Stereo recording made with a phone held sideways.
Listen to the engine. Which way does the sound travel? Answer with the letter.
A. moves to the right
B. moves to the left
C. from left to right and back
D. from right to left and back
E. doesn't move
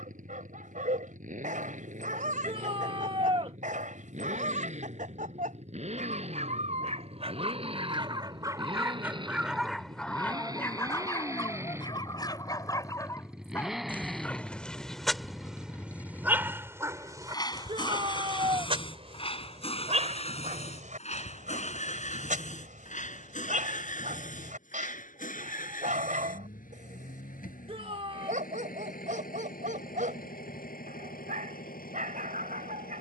B.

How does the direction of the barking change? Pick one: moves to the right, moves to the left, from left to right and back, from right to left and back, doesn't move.
from right to left and back.